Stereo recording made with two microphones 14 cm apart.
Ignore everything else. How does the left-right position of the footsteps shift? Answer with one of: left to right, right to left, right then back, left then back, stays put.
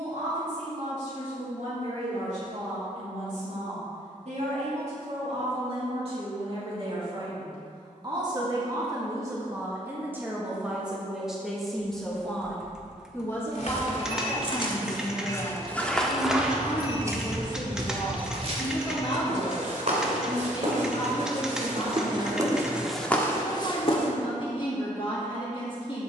right then back.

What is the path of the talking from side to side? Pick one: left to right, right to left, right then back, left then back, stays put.
right to left.